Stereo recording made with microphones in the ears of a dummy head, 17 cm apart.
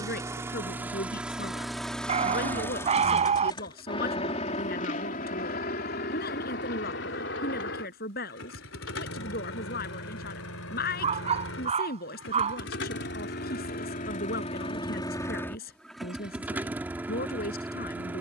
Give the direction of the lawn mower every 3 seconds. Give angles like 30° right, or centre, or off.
centre, 40° left, 60° left, 80° left, 50° left, centre.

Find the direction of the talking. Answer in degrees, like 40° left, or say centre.
50° left.